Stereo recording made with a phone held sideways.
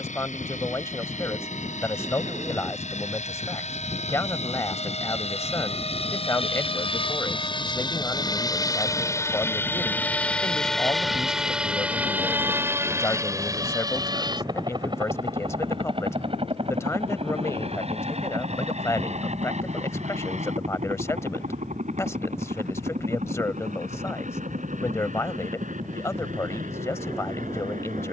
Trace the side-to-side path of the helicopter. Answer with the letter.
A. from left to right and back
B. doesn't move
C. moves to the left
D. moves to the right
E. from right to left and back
D.